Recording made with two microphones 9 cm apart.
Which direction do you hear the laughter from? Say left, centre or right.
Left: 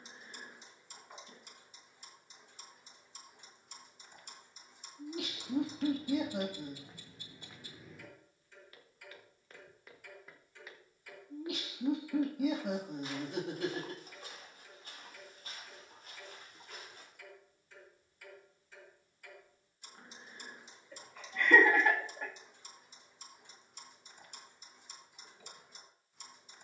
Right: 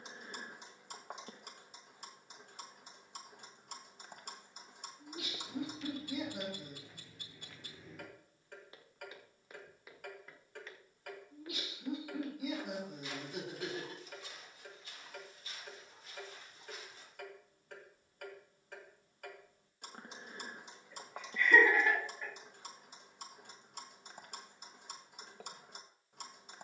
left.